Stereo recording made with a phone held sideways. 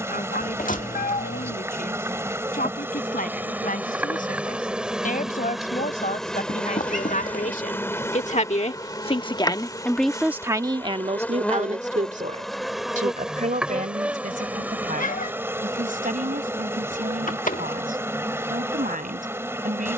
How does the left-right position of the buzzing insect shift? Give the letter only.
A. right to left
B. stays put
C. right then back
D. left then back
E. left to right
D.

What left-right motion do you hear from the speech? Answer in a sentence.
You can hear the speech move to the right.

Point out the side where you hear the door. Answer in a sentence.
You can hear the door on the left.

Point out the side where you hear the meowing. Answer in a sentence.
In this clip you hear the meowing on the left.